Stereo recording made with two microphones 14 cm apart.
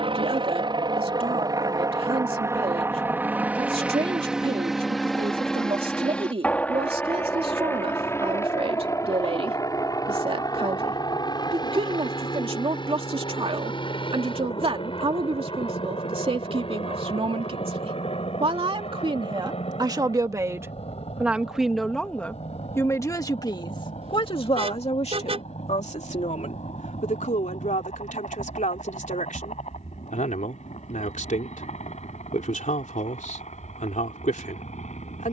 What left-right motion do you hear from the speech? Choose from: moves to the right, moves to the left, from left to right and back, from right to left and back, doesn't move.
moves to the left.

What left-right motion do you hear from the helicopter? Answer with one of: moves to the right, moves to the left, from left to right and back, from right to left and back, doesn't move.
moves to the left.